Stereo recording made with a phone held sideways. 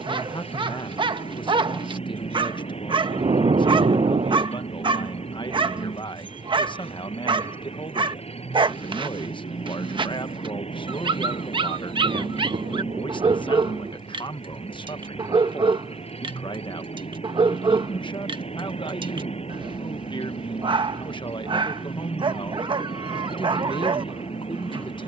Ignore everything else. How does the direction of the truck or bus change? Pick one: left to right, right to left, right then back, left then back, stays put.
stays put.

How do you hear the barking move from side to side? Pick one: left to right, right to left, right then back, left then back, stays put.
stays put.